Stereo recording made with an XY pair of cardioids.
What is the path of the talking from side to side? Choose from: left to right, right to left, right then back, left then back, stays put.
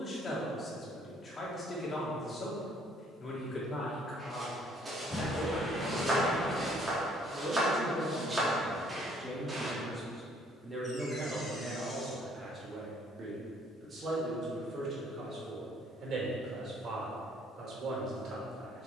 left to right.